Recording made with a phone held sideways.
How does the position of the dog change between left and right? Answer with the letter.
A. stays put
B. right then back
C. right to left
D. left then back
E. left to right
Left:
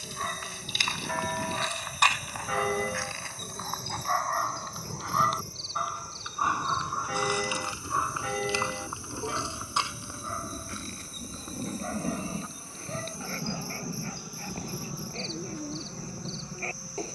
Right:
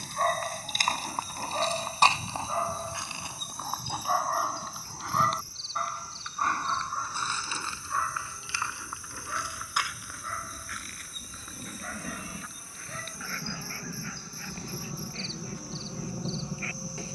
C.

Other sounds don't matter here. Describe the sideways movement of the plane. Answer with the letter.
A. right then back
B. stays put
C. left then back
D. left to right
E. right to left
D.